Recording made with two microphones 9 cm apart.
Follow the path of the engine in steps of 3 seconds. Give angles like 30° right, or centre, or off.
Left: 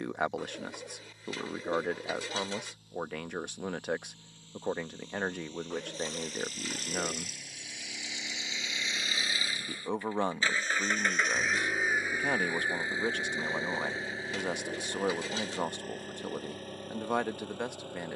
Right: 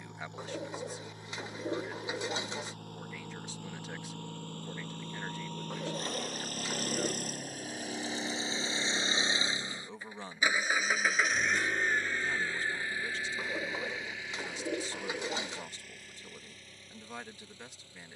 70° right, 60° right, 40° right, 10° right, 30° left, 50° left.